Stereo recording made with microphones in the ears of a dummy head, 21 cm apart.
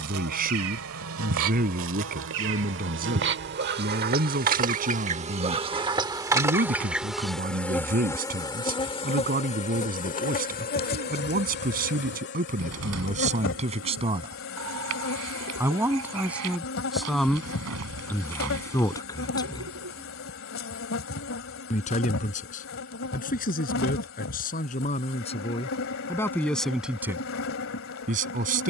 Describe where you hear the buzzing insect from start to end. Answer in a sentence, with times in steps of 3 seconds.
You can hear the buzzing insect on the right from 0 s, in the centre from 6 s and on the left from 9 s.